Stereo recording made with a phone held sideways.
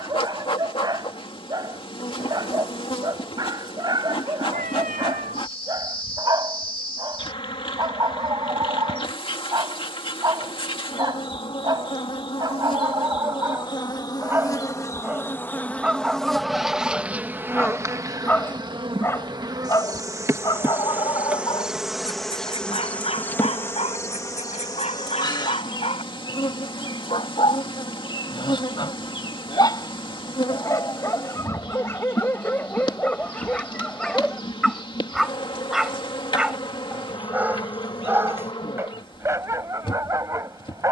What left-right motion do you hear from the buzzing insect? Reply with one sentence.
In this clip you hear the buzzing insect move from left to right and back again.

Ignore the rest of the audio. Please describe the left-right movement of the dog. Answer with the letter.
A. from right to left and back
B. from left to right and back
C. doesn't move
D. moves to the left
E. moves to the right
A.